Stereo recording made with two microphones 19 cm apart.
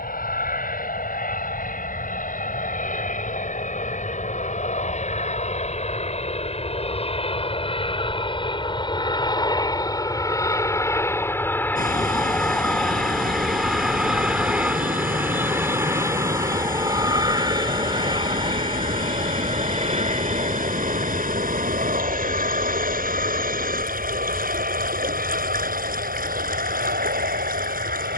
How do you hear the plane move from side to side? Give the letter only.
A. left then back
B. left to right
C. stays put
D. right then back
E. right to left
B.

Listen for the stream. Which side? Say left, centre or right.
right.